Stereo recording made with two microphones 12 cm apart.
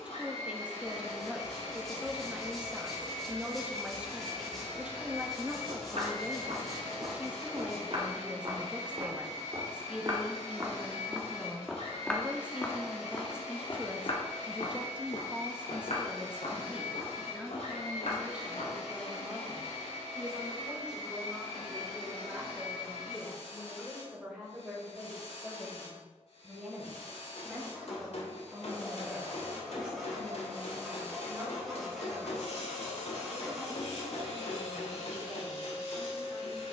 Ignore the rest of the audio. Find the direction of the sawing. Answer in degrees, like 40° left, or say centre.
centre.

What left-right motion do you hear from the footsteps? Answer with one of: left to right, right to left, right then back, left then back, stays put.
right to left.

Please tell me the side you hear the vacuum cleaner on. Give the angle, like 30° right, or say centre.
60° left.